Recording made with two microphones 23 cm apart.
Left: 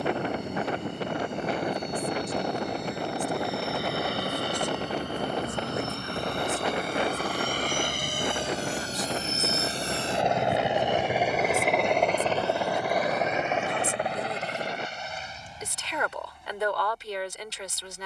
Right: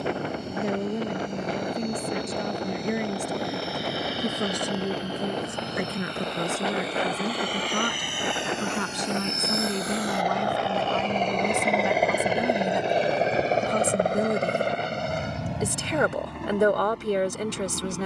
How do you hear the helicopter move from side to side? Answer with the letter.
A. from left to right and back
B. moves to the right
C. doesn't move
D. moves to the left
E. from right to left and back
B.